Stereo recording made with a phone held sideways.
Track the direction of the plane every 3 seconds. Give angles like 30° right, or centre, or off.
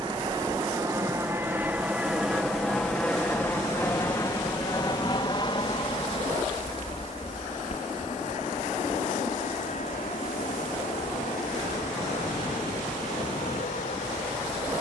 10° right, 20° left, 50° left, 60° left, 60° left.